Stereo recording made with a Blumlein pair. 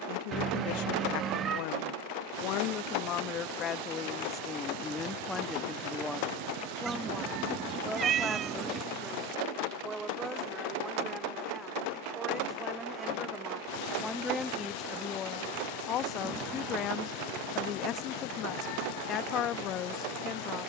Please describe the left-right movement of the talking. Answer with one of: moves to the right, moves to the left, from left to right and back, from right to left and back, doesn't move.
from left to right and back.